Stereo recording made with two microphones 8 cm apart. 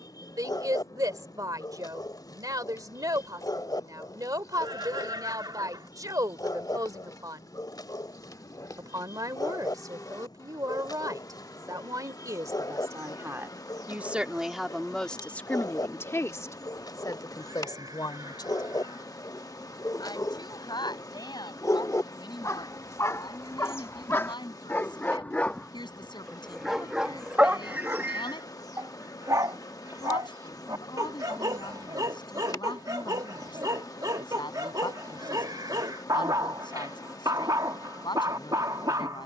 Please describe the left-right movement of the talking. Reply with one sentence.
You can hear the talking travel towards the left.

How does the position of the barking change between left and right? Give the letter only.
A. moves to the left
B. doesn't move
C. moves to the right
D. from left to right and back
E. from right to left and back
C.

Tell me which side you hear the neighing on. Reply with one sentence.
You can hear the neighing on the right.